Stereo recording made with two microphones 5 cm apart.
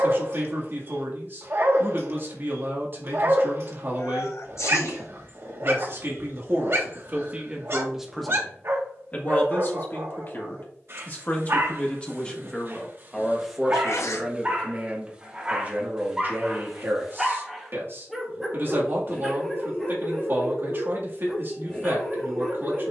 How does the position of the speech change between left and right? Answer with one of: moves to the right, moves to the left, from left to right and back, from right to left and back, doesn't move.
from right to left and back.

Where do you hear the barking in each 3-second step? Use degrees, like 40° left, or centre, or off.
60° right, 60° right, 60° right, 60° right, 40° right, 10° right, centre, 10° left.